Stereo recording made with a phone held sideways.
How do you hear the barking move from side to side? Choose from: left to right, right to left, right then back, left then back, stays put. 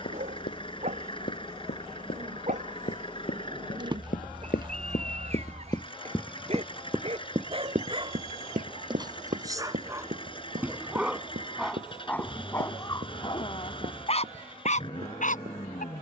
right to left.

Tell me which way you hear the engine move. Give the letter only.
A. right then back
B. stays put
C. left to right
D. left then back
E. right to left
B.